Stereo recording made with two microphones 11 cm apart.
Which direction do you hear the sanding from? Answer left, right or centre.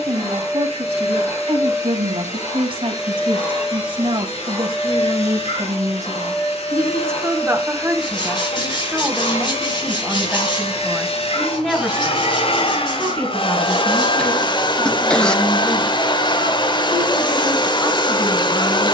left.